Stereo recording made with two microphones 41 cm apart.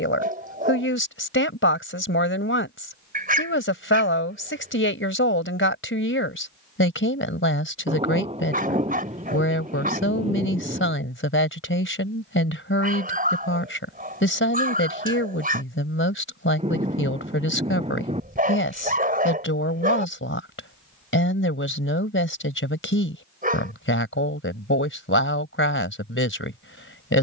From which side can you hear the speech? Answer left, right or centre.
left.